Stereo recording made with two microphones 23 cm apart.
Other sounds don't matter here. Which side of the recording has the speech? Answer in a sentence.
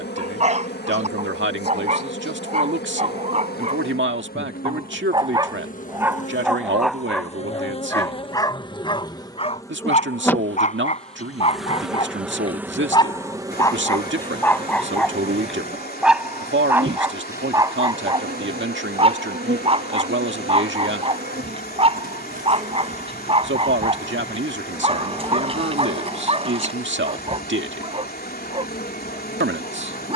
You can hear the speech on the right.